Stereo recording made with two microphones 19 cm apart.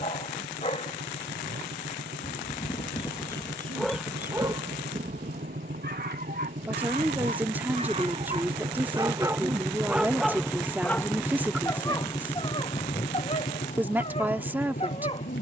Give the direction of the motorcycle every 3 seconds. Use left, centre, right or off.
right, right, right, centre, left.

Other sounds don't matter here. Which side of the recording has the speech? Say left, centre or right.
centre.